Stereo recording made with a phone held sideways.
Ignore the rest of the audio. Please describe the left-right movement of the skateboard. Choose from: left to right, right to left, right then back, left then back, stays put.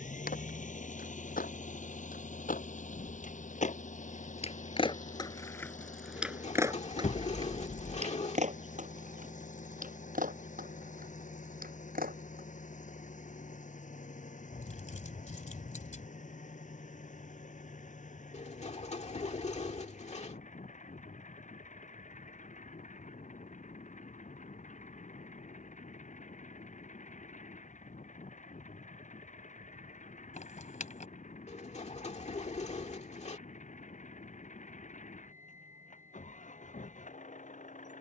left to right.